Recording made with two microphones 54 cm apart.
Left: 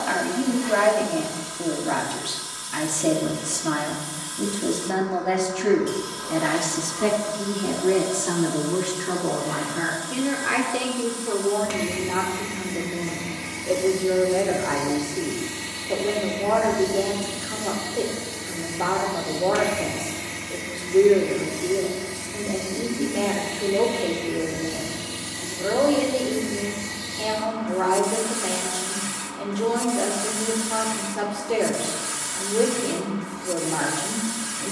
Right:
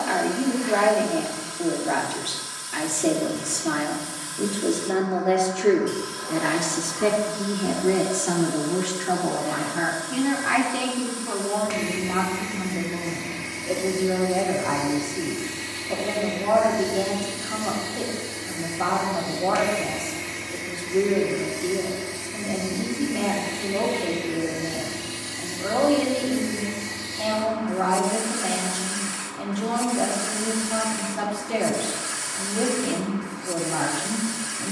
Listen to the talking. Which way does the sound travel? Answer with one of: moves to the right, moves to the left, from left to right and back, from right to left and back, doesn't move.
moves to the right.